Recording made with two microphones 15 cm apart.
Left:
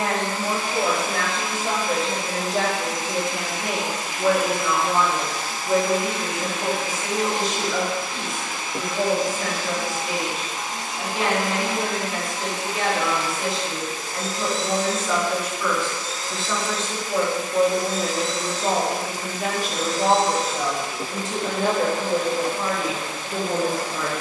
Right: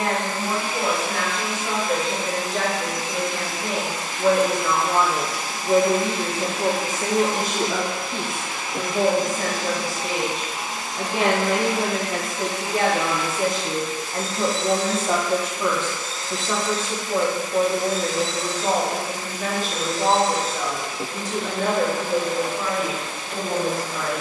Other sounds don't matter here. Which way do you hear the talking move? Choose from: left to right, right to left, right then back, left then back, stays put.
right then back.